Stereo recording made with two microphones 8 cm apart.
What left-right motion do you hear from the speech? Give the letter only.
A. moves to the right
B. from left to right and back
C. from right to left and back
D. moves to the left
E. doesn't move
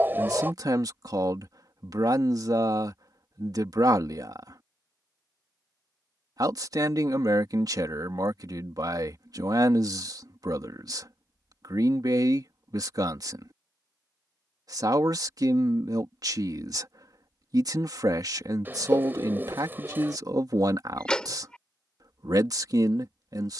E.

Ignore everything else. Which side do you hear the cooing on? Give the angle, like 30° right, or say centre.
30° right.